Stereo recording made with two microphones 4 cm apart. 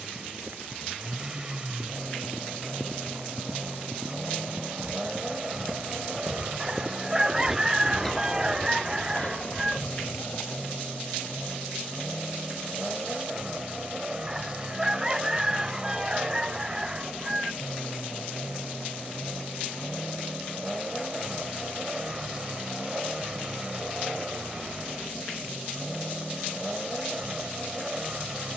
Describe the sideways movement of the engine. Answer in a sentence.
You can hear the engine stay in one place.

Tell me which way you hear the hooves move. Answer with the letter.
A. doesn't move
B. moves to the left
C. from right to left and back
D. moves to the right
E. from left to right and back
B.